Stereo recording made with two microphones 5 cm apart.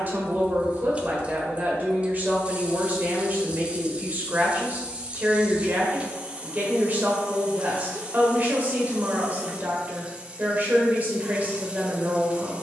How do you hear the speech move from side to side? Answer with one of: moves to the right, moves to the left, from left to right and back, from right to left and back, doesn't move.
doesn't move.